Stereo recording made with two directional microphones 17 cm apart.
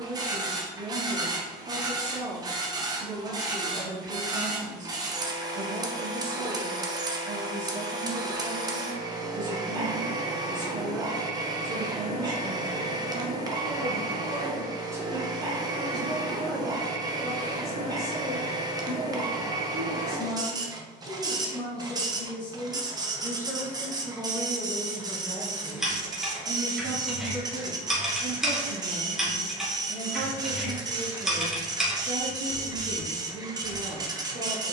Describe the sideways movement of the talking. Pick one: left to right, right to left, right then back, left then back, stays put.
left then back.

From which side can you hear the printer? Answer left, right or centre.
right.